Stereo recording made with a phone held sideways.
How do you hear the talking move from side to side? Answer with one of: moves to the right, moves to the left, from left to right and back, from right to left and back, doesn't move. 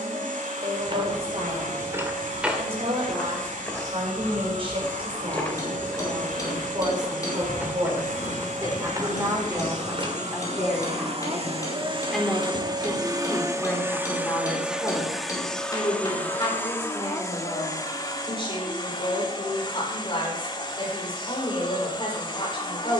moves to the left.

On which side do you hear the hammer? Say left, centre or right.
left.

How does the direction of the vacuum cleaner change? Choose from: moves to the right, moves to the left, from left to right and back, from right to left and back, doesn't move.
moves to the left.